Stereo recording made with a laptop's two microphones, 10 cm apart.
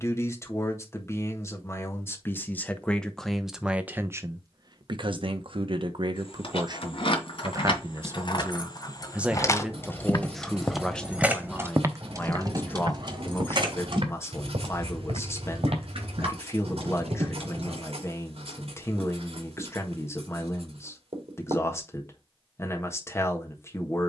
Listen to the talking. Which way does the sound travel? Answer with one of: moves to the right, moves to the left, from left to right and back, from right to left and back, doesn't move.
from left to right and back.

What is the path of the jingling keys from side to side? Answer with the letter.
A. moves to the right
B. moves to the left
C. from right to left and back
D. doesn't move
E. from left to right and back
A.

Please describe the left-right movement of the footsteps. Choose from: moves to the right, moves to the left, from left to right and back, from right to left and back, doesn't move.
moves to the right.